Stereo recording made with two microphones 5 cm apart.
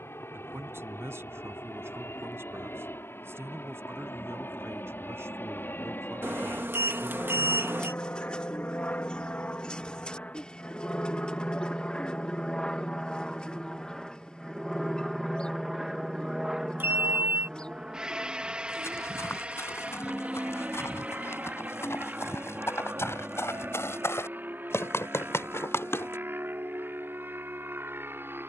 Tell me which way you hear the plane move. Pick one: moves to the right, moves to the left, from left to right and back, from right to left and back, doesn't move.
moves to the right.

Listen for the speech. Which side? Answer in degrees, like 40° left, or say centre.
70° right.